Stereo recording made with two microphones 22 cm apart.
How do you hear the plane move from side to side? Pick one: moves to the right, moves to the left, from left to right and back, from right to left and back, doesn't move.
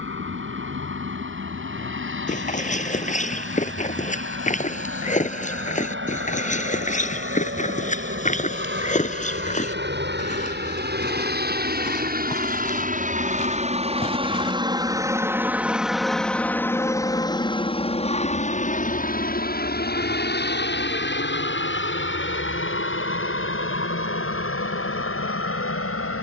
moves to the left.